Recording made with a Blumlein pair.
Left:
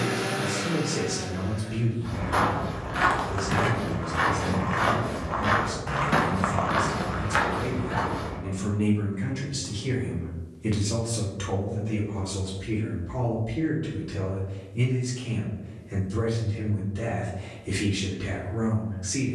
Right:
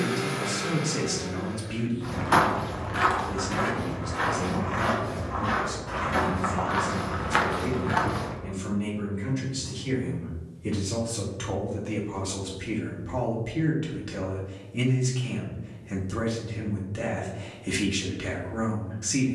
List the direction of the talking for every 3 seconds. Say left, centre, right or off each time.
right, right, left, left, right, right, right.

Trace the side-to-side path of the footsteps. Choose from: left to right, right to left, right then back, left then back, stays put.
left then back.